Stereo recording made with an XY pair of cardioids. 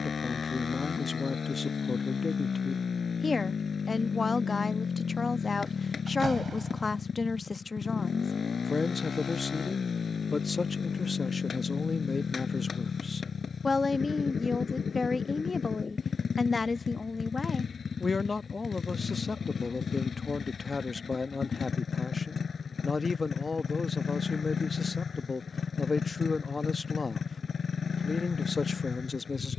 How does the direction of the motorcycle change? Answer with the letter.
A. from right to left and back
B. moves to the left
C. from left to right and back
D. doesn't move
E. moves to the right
D.